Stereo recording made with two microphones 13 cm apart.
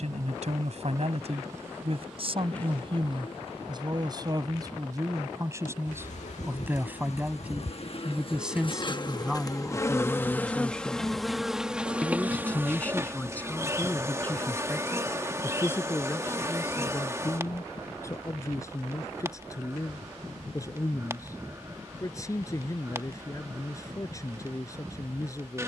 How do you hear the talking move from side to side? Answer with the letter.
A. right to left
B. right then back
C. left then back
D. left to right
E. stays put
A.